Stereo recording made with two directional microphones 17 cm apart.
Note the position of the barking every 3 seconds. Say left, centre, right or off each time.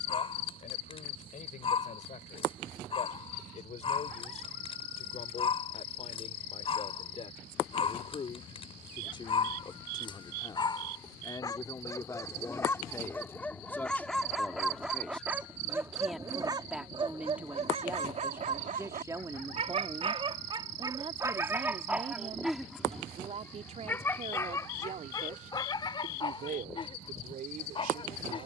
left, left, left, left, centre, right, right, centre, left, left.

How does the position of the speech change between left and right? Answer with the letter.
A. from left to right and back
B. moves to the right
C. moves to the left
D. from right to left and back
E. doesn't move
B.